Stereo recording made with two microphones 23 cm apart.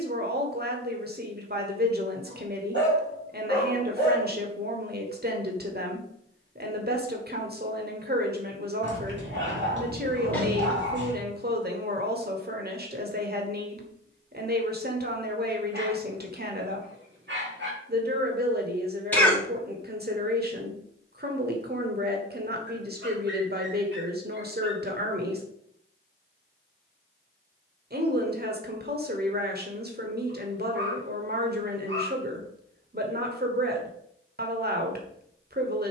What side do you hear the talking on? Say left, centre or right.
right.